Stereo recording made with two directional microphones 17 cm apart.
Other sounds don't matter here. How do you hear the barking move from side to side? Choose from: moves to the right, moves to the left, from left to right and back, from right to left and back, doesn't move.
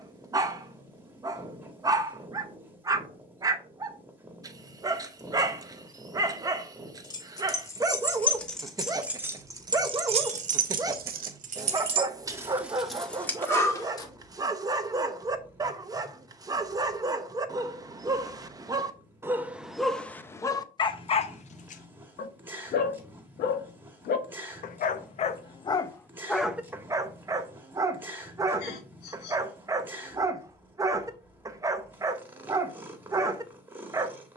from right to left and back.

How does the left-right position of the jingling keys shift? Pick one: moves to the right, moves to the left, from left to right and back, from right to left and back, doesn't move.
from left to right and back.